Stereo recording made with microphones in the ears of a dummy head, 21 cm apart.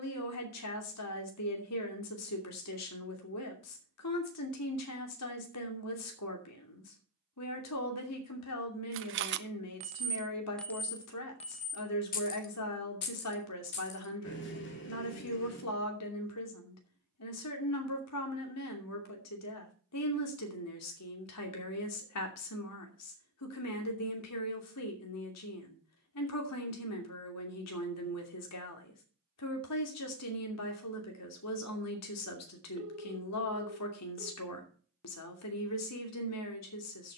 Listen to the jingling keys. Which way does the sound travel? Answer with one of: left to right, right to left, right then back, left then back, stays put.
right to left.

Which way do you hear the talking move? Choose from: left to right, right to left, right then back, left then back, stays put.
stays put.